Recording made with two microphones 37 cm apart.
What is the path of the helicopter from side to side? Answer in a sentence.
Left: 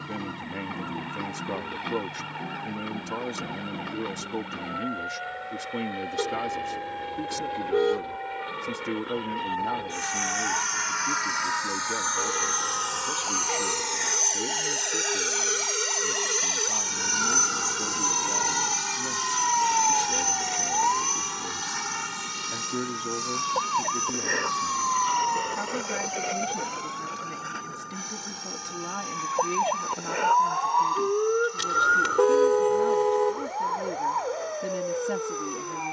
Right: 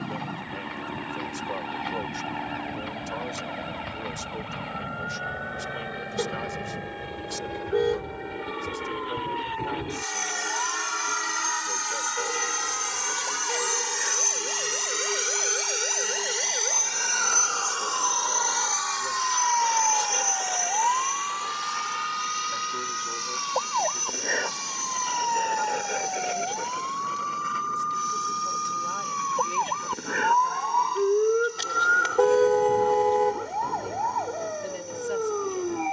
You can hear the helicopter move to the left.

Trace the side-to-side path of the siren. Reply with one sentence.
You can hear the siren go from the left side to the right.